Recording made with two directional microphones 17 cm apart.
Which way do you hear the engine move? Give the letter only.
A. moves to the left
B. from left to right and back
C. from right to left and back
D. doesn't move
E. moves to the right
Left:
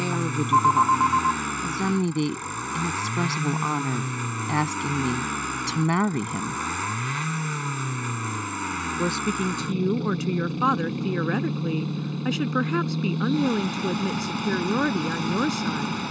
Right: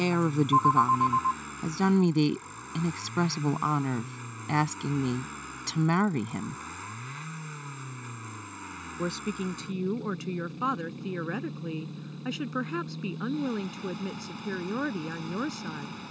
D.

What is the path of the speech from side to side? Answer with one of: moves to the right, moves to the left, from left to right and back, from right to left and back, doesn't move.
moves to the left.